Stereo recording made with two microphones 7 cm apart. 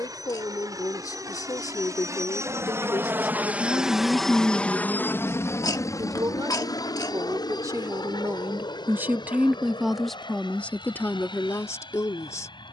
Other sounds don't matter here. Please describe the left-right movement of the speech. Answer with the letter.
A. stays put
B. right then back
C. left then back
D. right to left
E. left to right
B.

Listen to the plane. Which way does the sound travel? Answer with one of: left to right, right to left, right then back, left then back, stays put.
right to left.